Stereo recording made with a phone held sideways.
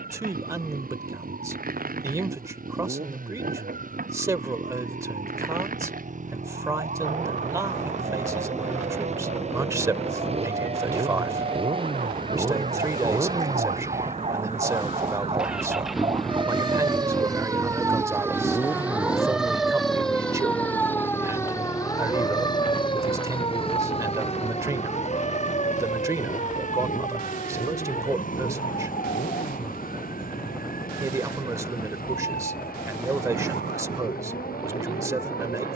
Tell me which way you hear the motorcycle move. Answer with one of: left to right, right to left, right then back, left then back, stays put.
right to left.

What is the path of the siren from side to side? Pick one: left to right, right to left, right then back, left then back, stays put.
right to left.